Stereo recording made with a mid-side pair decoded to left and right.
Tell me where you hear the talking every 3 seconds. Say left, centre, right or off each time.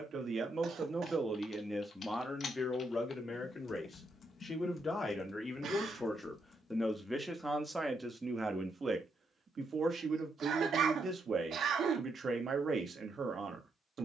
centre, left, centre, right, right.